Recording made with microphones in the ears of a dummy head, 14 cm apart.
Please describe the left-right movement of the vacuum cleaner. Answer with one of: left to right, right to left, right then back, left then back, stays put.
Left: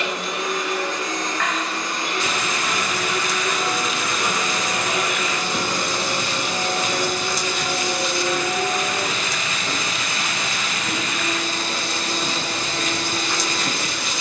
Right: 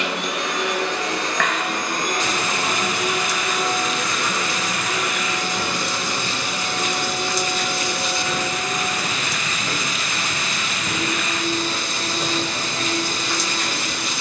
right to left.